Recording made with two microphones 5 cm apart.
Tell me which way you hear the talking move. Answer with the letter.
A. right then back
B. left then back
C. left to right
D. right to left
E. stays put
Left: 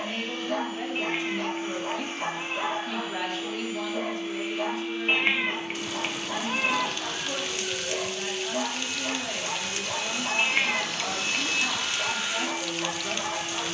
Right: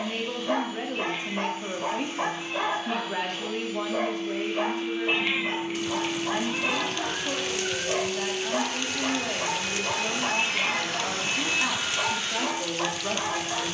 E.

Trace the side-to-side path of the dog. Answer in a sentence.
You can hear the dog stay put.